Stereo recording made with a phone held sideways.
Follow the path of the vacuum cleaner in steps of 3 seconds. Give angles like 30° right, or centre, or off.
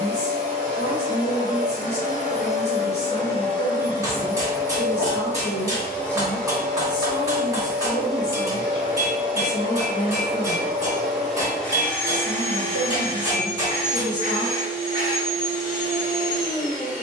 50° left, 20° left, centre, centre, 30° left, 60° left.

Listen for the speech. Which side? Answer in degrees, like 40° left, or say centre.
70° left.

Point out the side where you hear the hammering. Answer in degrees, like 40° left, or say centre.
20° right.